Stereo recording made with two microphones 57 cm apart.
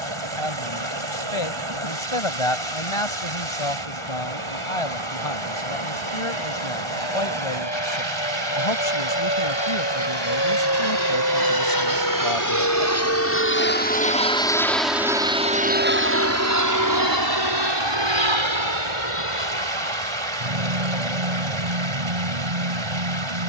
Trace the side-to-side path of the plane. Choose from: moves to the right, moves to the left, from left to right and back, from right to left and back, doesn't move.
moves to the right.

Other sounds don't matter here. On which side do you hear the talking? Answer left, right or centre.
left.